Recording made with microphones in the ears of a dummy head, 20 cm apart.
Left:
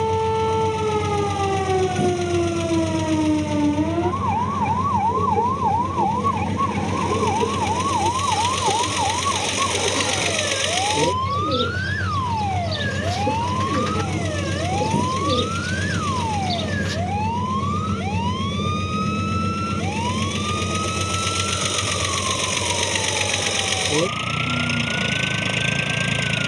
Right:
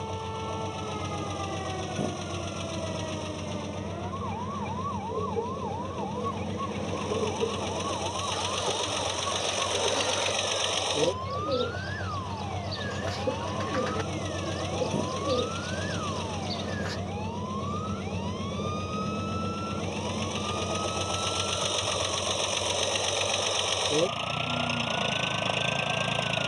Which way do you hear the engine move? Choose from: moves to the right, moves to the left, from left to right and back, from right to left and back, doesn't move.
doesn't move.